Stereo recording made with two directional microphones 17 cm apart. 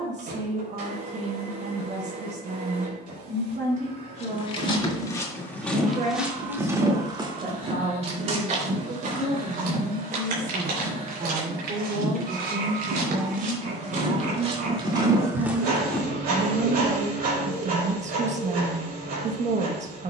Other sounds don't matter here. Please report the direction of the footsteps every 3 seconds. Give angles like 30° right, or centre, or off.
off, 20° left, 30° right, 60° right, 50° right, 10° right, off.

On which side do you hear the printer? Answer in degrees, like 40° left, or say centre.
60° right.